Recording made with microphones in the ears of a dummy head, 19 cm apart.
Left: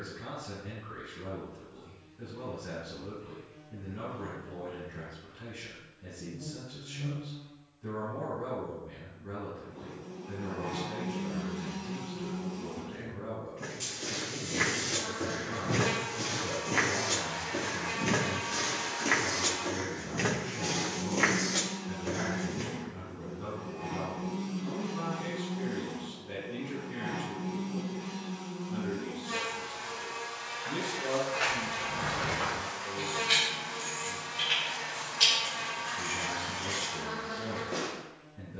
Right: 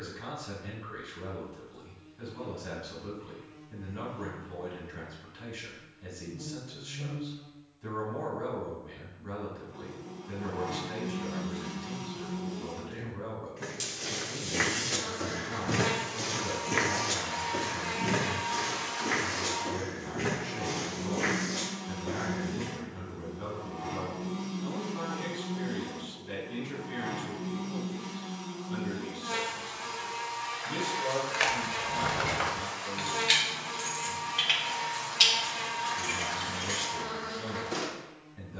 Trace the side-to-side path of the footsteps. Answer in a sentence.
You can hear the footsteps travel towards the left.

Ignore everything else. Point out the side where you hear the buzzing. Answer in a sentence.
In this clip you hear the buzzing on the right.